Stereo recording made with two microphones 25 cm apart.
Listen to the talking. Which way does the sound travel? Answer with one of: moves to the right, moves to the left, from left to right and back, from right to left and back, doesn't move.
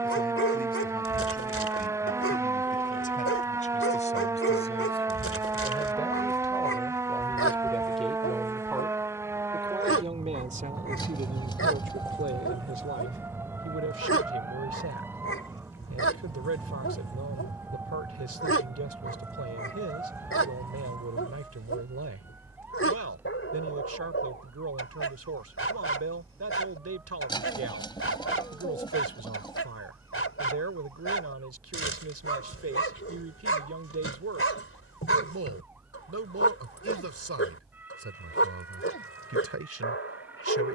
moves to the right.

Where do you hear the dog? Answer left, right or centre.
left.